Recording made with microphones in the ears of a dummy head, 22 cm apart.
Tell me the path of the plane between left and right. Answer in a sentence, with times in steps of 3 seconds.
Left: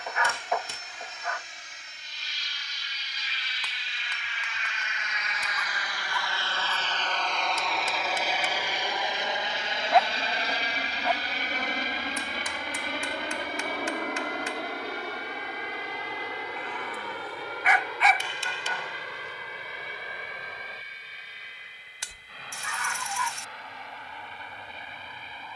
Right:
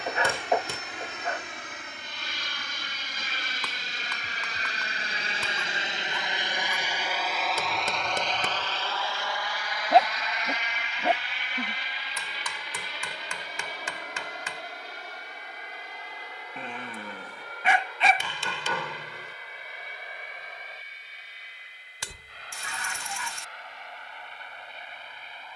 You can hear the plane on the right from 0 s, in the centre from 6 s and on the left from 9 s.